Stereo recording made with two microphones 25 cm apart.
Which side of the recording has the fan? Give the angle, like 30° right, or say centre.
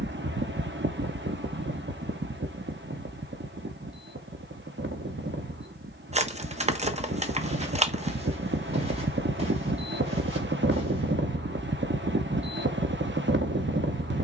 50° right.